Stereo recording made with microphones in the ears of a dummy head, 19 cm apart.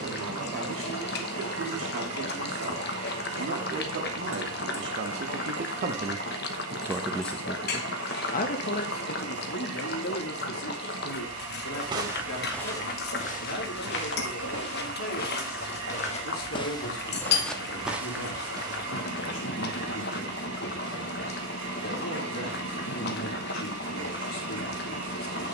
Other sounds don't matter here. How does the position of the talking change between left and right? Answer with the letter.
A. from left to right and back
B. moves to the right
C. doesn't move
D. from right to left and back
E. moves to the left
E.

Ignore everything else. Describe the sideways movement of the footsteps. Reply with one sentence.
In this clip you hear the footsteps go left and come back.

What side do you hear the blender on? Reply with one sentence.
You can hear the blender on the right.